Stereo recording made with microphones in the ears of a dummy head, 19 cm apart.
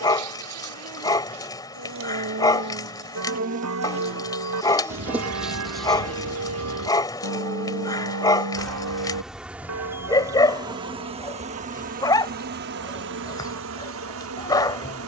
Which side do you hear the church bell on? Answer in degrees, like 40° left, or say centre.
80° right.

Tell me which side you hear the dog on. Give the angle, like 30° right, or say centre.
20° left.